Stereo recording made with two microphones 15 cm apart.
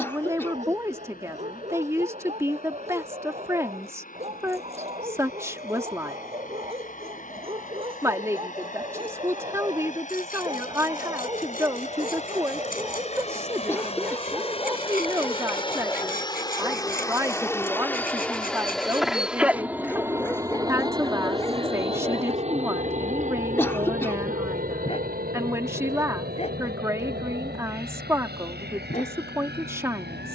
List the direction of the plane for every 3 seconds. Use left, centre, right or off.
left, left, left, left, left, left, centre, right, right, right.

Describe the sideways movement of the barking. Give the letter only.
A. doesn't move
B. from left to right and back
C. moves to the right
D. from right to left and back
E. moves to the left
E.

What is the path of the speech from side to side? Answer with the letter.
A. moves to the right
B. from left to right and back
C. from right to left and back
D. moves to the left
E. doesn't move
E.